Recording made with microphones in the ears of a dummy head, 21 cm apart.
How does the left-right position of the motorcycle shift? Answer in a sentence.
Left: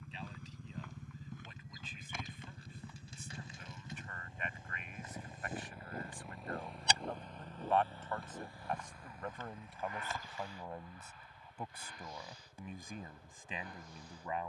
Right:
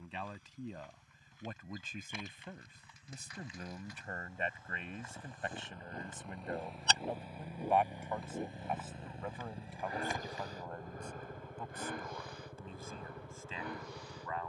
In this clip you hear the motorcycle travel towards the right.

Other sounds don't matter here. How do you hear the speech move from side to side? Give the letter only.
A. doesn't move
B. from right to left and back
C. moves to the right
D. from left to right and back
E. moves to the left
E.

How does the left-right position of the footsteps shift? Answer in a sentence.
In this clip you hear the footsteps move to the right.